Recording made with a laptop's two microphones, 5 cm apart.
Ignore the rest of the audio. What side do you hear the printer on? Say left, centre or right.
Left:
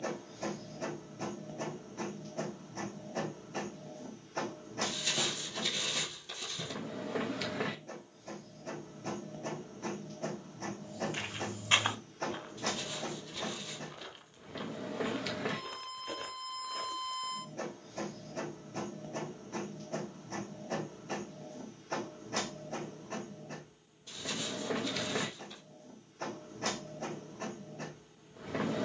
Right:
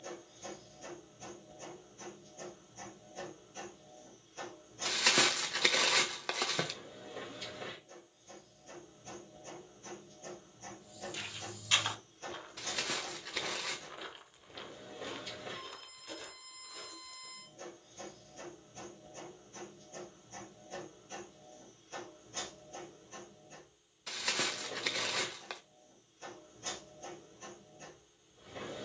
left.